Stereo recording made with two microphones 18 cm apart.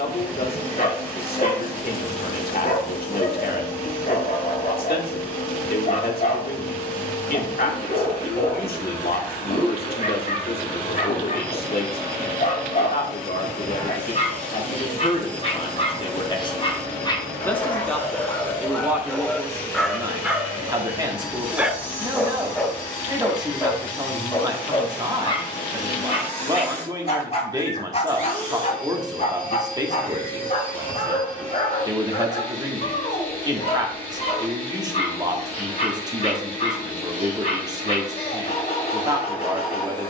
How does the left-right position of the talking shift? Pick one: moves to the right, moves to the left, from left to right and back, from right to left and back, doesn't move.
moves to the right.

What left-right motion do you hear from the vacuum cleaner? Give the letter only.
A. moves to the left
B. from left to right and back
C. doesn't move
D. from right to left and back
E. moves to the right
C.